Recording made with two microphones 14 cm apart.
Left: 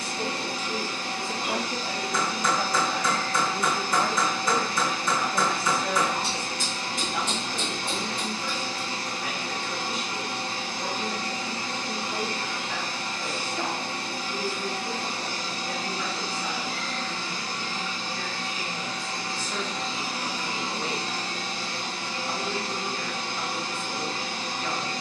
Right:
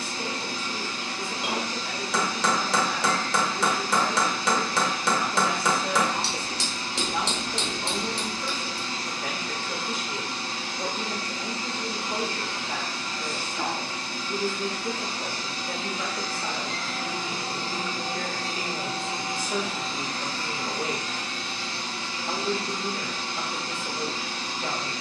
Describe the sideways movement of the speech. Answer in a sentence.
You can hear the speech travel towards the right.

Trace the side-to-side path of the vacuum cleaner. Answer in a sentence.
In this clip you hear the vacuum cleaner go right and come back.